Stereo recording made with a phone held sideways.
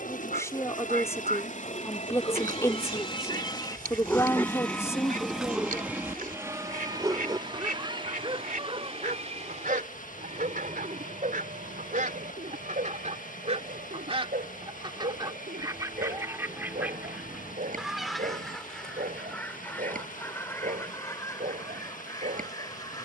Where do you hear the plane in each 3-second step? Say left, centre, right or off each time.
left, centre, right, right, right, right, right, right.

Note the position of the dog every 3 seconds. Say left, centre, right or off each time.
left, centre, right, right, right, right, right, right.